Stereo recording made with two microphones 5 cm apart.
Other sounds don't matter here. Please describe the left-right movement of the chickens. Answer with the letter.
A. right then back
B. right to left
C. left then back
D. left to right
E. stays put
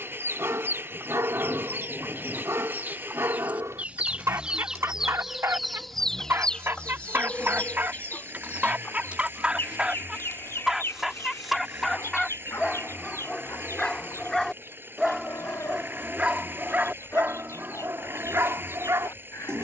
B.